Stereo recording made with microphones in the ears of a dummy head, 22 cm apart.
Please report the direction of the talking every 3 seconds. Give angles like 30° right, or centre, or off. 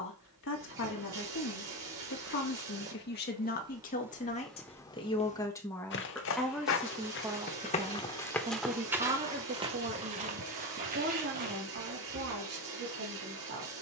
50° left, 30° left, 10° right, 40° right, 50° right.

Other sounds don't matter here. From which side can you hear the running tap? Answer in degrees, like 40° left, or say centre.
60° right.